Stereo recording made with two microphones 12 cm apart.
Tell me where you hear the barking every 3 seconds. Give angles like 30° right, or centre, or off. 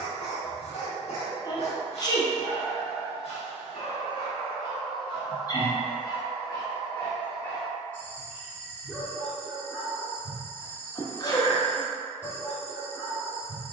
70° left, 50° left, 20° left, 10° right, 10° right.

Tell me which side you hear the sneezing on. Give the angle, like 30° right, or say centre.
30° left.